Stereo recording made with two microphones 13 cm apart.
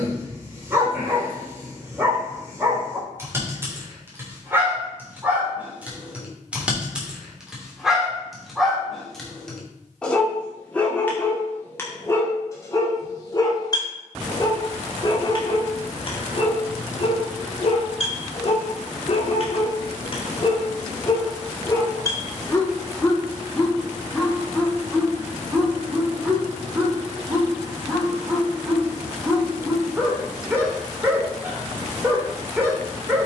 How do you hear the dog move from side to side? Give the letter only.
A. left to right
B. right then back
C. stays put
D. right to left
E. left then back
E.